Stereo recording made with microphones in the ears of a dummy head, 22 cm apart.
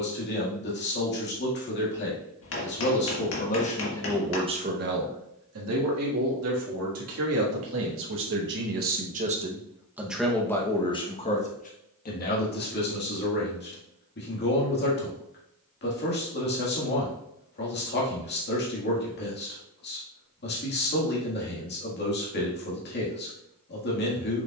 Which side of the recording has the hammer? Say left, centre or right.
left.